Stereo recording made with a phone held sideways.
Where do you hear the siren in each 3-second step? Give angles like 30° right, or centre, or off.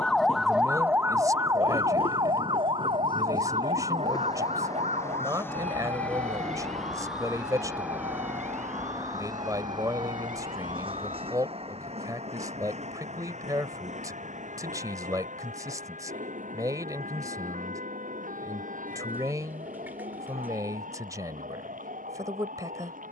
20° right, 50° right, 60° right, 60° right, 70° right, 70° right, 70° right, 70° right.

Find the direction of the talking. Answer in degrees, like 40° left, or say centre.
20° right.